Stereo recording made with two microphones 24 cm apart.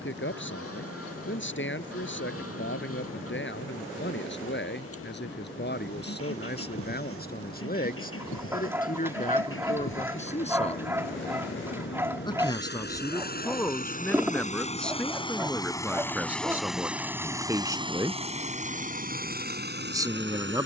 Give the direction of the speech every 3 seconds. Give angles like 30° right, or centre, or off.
50° left, 50° left, 40° left, 30° left, 10° left, 10° right, 10° right.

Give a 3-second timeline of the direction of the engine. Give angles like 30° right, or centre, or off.
70° left, 70° left, 60° left, 60° left, 40° left, centre, 40° right.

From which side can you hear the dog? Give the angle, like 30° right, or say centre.
10° right.